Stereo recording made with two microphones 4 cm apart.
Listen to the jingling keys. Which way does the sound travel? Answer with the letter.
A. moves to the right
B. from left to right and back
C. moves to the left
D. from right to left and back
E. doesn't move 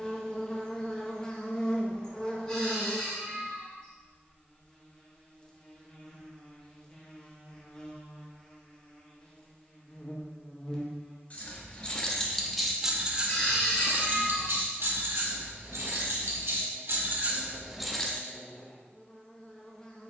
B.